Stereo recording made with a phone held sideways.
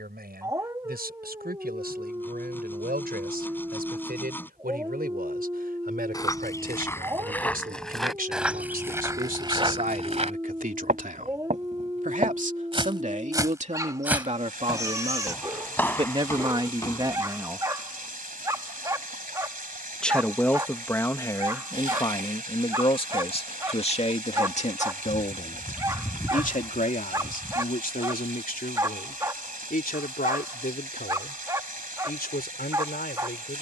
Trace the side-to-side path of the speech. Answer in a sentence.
In this clip you hear the speech go from the right side to the left.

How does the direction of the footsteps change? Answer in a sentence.
In this clip you hear the footsteps go right and come back.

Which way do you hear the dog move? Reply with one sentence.
You can hear the dog stay in one place.